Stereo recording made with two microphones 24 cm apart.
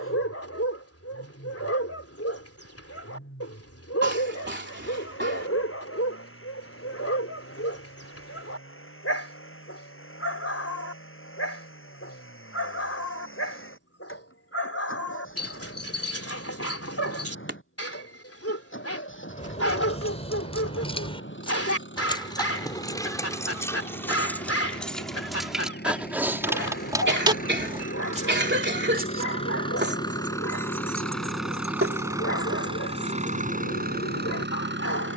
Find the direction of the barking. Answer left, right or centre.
left.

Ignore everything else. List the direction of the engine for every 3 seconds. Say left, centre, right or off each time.
left, left, left, left, left, left, left, left, left, left, centre, right.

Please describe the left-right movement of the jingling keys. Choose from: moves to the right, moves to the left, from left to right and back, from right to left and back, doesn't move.
moves to the right.